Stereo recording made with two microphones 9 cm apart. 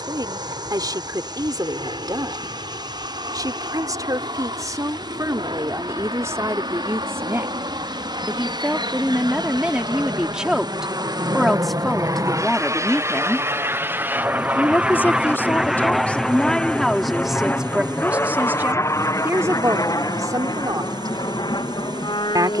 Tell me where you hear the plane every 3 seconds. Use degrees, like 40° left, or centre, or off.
70° right, 70° right, 60° right, 50° right, 30° right, 10° left, 40° left, 50° left.